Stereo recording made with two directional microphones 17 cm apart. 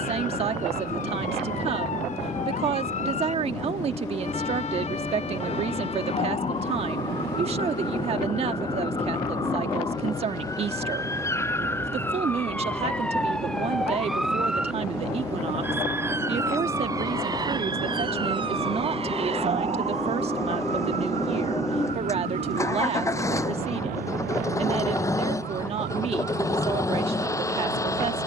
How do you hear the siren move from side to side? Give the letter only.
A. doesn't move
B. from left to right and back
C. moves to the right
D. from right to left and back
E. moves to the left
C.